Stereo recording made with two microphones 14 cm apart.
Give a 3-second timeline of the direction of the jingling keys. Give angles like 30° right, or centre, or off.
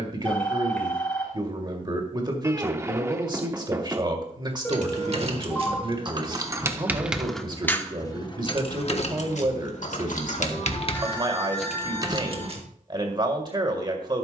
off, 40° right, 10° left, 40° left, 40° right.